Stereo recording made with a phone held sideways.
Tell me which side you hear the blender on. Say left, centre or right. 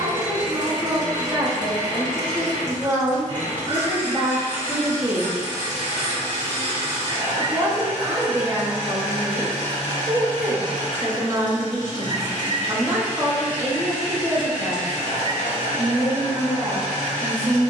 right.